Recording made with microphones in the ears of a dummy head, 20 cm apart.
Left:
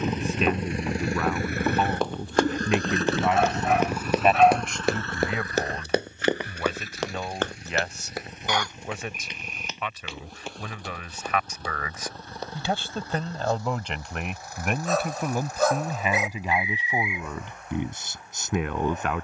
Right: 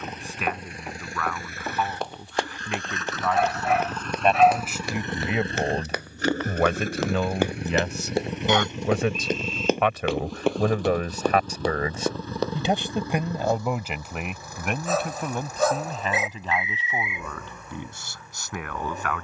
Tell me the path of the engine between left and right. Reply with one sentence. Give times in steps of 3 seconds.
You can hear the engine on the left from 0 s, in the centre from 3 s and on the right from 6 s.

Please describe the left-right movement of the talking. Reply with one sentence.
You can hear the talking go right and come back.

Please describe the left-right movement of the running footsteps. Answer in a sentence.
You can hear the running footsteps move to the right.